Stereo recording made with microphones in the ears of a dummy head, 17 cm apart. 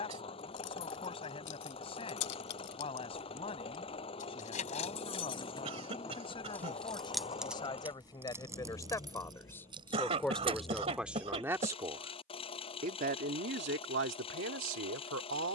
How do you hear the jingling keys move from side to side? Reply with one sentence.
You can hear the jingling keys move from left to right.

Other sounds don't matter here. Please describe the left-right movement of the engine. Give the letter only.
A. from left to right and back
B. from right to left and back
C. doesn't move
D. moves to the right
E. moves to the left
C.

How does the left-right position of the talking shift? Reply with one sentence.
In this clip you hear the talking go from the left side to the right.